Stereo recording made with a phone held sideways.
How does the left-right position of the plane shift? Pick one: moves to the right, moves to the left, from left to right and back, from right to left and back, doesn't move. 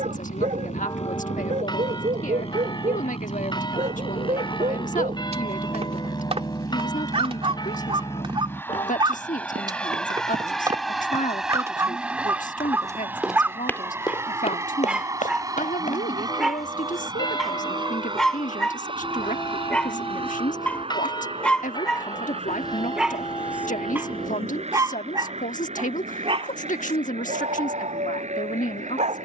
moves to the right.